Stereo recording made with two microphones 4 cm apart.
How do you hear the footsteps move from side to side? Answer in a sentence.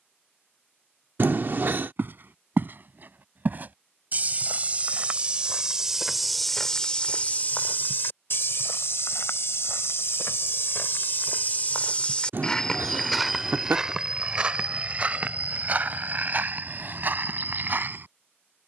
In this clip you hear the footsteps move from right to left and back again.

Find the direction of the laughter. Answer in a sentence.
In this clip you hear the laughter on the right.